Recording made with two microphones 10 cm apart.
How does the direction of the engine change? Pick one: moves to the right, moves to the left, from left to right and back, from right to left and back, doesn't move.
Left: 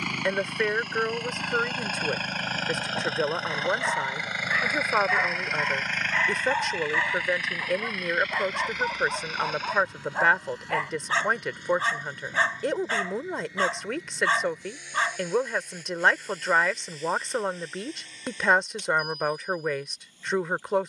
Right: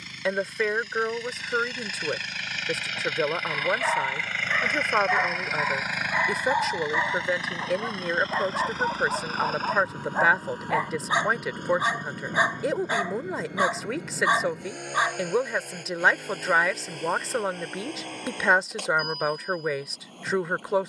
moves to the right.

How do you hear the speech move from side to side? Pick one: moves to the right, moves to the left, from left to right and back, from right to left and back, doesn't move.
doesn't move.